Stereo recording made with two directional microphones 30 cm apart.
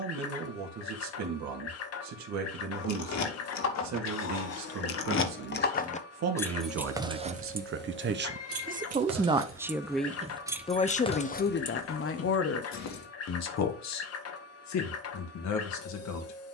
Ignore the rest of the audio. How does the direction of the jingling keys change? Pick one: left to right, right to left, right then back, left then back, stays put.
right then back.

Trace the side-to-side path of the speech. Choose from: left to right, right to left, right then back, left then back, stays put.
right to left.